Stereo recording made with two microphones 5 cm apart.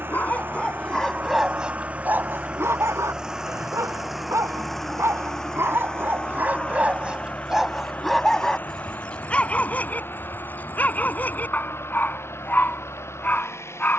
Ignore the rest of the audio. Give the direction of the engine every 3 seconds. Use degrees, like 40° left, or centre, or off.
30° right, centre, 30° left, 40° left, 50° left.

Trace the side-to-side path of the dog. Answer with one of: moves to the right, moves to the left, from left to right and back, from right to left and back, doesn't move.
from left to right and back.